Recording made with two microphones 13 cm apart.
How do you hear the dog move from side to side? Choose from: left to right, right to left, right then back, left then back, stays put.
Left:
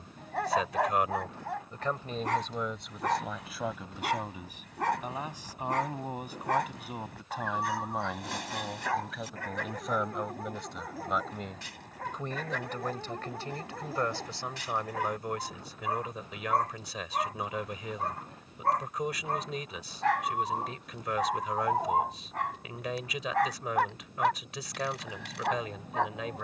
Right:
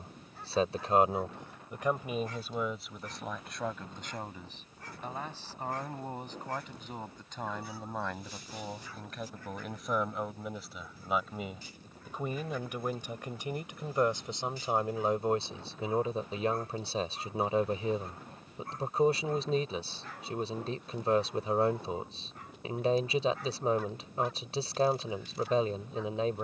stays put.